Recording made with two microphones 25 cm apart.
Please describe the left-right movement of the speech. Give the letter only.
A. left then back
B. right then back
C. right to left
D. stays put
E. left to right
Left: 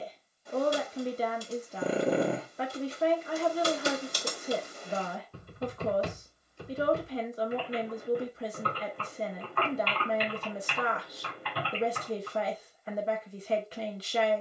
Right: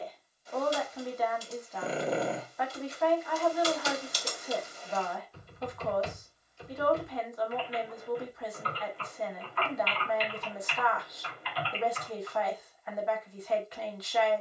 D.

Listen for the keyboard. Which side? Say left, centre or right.
left.